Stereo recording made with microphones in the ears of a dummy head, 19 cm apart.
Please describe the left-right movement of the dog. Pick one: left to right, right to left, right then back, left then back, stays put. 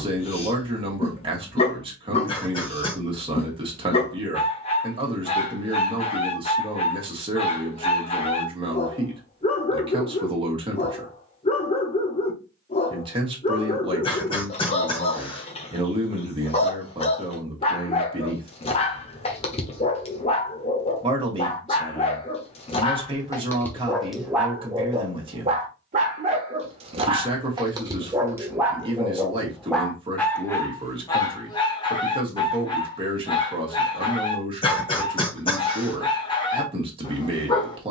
right then back.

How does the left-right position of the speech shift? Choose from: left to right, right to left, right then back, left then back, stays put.
stays put.